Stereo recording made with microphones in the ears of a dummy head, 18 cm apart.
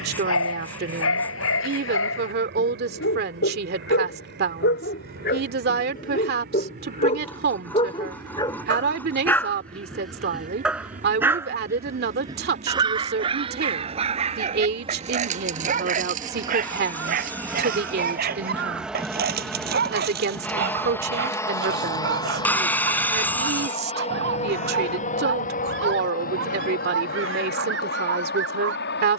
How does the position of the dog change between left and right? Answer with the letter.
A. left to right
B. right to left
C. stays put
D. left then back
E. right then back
A.